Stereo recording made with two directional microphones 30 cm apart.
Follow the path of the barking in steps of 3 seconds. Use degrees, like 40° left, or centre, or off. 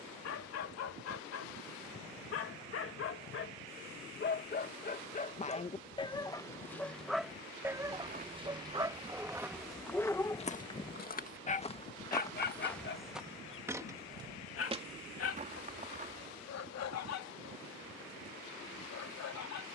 50° left, 30° left, centre, 10° left, 40° left, 60° left, 60° left.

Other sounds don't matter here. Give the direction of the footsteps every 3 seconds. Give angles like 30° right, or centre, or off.
off, off, 20° right, 10° left, centre, 30° right, off.